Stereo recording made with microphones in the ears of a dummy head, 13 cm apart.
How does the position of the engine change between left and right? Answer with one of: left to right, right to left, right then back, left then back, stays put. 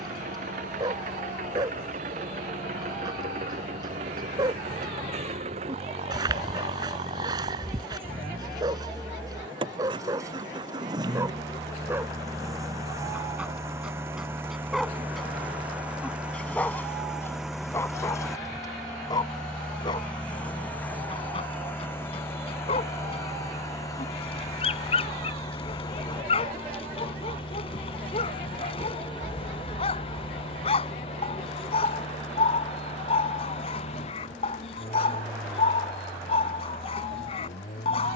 right to left.